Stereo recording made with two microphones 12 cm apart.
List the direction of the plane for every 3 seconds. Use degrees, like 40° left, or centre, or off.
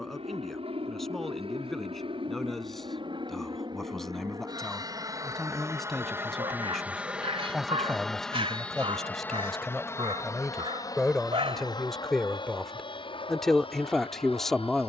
60° right, 40° right, centre, 30° left, 40° left.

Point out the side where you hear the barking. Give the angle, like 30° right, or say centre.
50° right.